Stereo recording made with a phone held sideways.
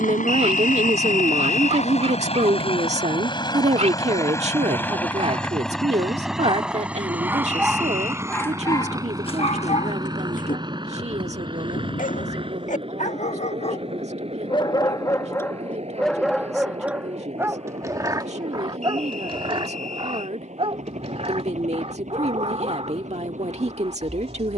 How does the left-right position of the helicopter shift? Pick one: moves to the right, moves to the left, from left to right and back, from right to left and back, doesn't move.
moves to the right.